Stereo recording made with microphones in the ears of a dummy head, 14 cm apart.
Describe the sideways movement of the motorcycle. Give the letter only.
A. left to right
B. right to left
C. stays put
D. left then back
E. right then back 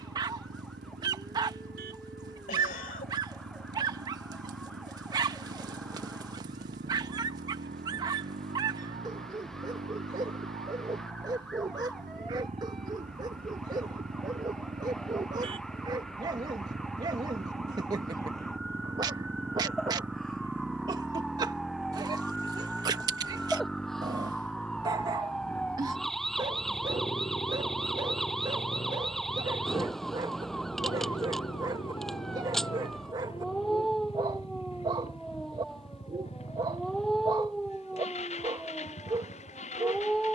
B.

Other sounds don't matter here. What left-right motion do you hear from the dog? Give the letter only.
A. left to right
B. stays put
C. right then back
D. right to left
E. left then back
B.